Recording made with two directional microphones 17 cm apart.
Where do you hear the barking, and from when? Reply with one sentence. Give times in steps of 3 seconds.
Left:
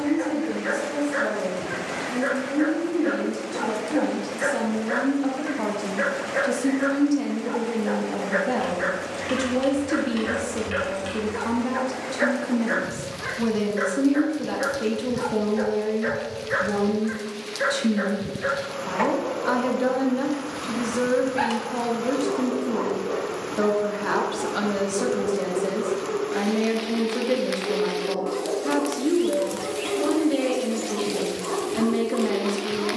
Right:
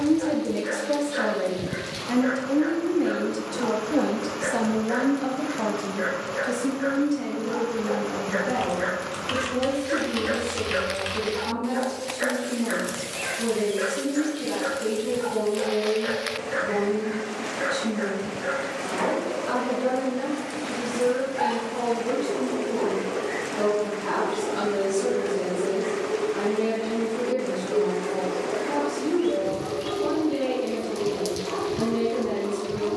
You can hear the barking on the left from 0 s, in the centre from 9 s and on the left from 12 s.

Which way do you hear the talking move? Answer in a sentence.
In this clip you hear the talking go from the right side to the left.